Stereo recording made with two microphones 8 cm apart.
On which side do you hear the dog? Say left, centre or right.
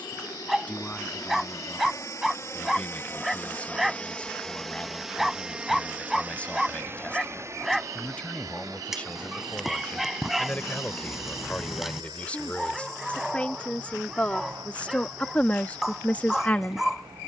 centre.